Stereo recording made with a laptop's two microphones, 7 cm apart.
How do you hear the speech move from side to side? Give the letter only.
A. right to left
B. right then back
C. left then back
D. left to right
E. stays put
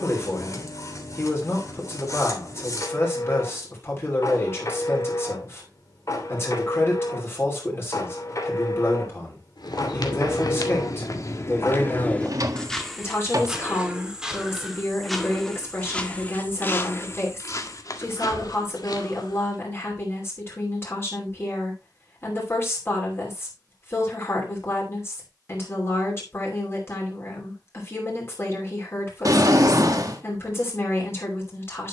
E.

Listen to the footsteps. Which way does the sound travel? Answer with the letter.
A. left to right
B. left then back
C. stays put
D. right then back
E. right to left
D.